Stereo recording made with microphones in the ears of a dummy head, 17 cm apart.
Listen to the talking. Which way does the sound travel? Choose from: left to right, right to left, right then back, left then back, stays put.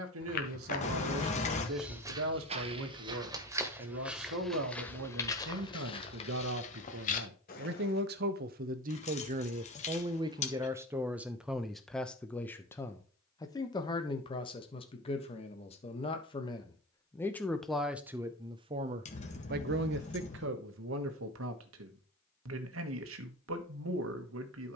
left then back.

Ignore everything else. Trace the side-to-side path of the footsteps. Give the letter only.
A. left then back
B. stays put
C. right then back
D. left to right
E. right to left
C.